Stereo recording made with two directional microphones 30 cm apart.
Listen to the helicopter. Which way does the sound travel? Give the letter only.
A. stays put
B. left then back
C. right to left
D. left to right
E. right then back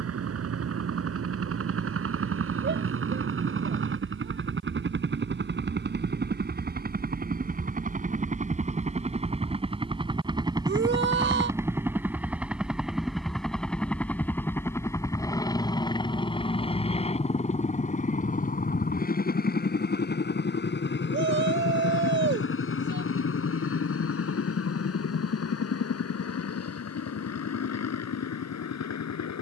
C.